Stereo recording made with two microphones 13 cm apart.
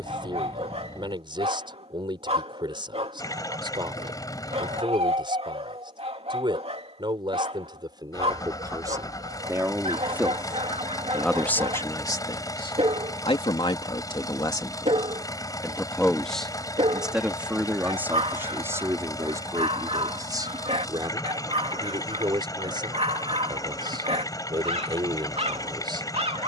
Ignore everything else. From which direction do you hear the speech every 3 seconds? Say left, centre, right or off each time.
right, right, right, centre, left, centre, right, right, right.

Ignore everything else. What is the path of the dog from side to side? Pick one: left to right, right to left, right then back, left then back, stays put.
stays put.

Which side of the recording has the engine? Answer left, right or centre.
left.